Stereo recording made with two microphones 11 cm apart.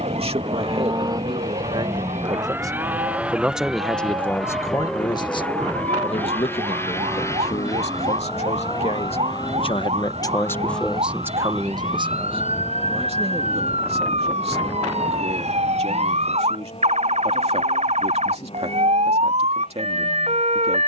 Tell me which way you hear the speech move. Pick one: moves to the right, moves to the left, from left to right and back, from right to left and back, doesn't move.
from right to left and back.